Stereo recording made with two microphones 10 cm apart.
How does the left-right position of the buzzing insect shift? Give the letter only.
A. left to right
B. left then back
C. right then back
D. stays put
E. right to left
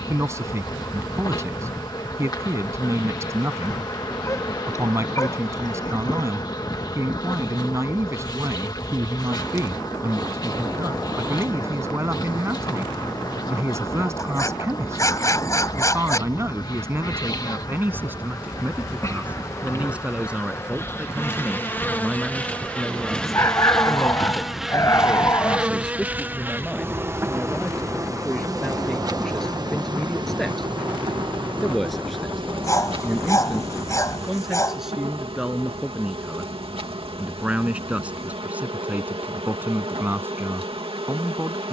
A.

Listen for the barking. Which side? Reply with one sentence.
In this clip you hear the barking on the left.